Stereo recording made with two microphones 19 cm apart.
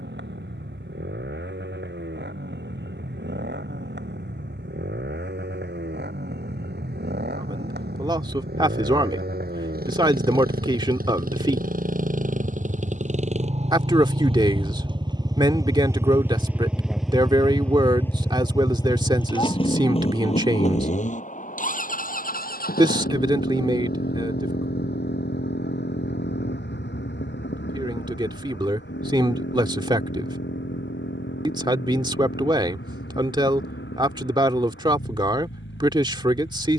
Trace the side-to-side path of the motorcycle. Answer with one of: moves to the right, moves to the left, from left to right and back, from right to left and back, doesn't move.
moves to the left.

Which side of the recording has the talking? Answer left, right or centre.
right.